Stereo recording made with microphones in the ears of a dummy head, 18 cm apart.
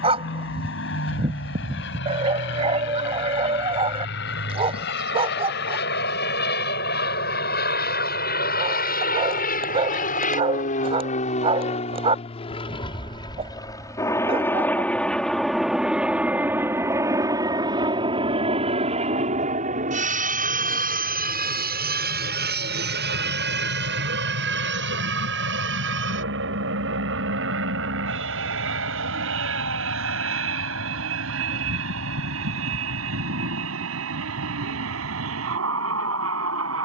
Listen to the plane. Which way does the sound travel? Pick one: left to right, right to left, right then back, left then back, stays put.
left to right.